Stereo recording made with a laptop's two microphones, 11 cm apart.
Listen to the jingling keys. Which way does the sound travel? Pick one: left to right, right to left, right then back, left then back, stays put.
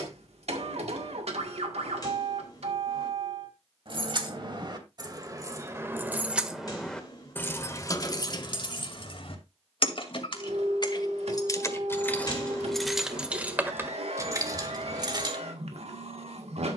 left then back.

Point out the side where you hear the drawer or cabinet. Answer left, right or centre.
left.